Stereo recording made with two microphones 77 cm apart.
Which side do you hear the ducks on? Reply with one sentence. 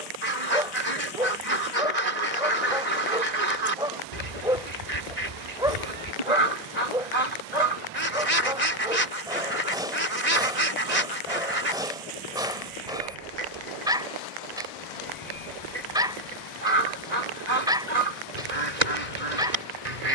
In this clip you hear the ducks on the right.